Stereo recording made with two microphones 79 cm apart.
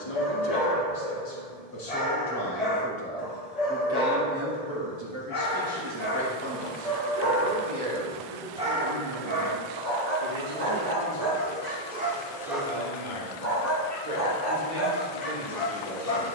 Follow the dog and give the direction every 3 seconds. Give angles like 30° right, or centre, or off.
50° left, 50° left, 10° left, 20° right, 10° left, 40° left.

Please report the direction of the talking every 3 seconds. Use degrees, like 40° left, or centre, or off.
30° left, 20° right, 50° right, 60° right, 70° right, 70° right.